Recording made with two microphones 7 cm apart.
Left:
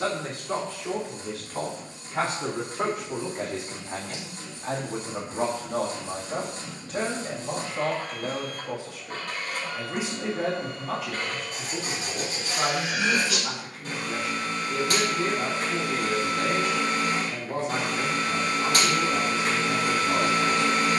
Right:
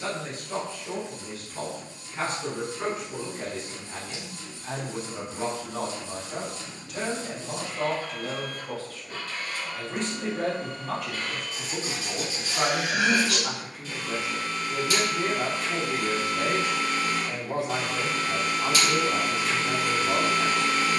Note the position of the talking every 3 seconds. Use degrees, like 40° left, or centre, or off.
80° left, 60° left, 30° left, centre, 20° right, 20° right, 20° right.